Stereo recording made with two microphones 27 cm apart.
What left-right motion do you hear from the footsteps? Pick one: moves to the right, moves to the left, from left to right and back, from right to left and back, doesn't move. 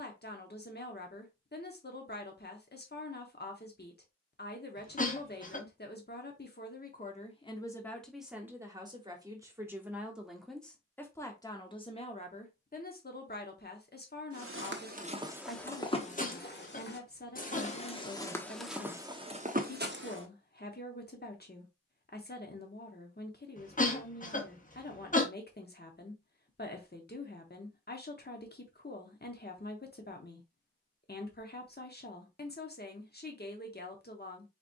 from right to left and back.